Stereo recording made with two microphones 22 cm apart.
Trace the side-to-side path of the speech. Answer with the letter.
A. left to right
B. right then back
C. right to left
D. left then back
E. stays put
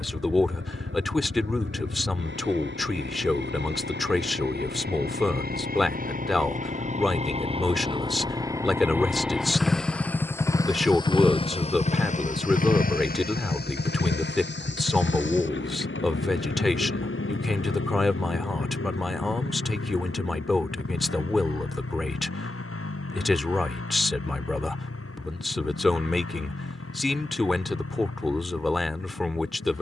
E.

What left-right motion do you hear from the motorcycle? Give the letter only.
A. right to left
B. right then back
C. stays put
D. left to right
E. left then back
A.